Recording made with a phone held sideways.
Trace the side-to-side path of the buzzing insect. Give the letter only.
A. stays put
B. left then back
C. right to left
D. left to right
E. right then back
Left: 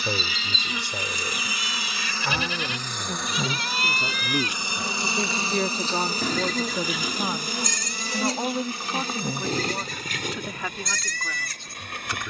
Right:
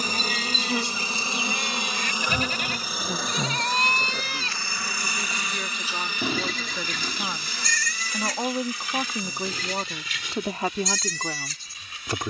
C.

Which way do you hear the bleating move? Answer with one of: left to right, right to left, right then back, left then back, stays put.
right to left.